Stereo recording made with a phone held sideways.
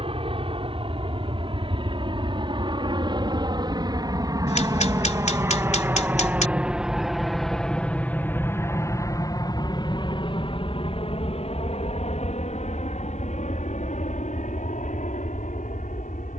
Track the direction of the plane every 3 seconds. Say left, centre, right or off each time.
right, right, centre, left, left, left.